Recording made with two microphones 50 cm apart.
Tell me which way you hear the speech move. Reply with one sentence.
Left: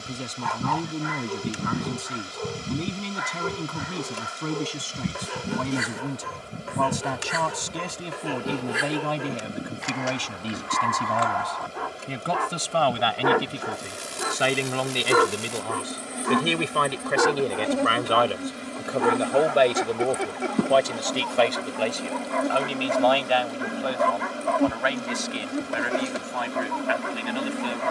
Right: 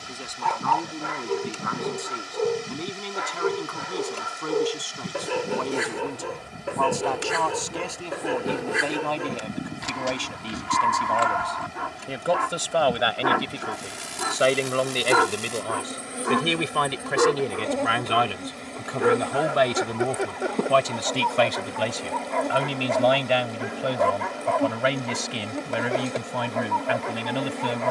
In this clip you hear the speech travel towards the right.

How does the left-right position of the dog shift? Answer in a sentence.
In this clip you hear the dog go from the right side to the left.